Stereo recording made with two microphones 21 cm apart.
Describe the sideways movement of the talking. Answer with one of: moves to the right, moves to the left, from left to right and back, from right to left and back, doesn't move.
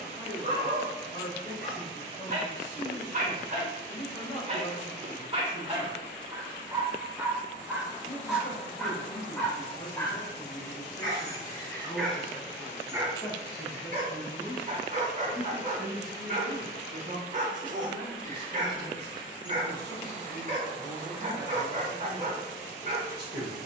moves to the right.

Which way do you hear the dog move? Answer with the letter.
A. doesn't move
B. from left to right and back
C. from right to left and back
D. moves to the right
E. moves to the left
C.